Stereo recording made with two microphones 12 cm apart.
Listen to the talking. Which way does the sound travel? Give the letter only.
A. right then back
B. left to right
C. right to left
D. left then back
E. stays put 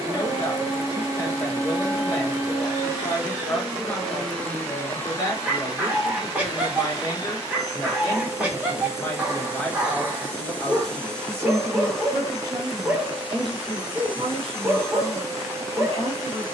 B.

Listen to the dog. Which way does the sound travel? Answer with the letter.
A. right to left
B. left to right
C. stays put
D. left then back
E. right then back
C.